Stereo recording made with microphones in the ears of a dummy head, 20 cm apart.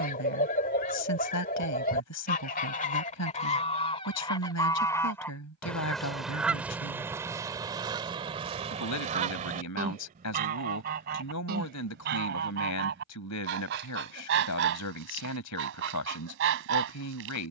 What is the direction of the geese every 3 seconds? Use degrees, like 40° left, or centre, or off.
40° left, 20° left, 20° right, 40° right, 50° right, 60° right.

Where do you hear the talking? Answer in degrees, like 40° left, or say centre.
80° left.